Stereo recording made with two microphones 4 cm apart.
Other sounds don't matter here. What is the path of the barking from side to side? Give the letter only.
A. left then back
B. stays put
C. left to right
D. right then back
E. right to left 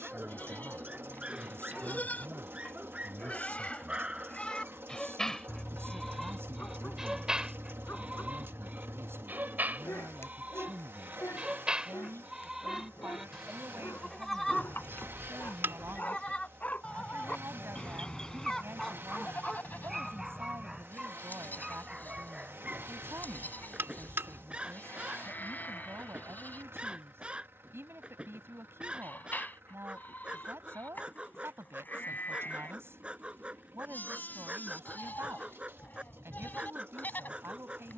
A.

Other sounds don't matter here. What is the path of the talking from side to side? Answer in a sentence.
In this clip you hear the talking stay put.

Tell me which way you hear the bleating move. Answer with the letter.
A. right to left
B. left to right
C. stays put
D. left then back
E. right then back
E.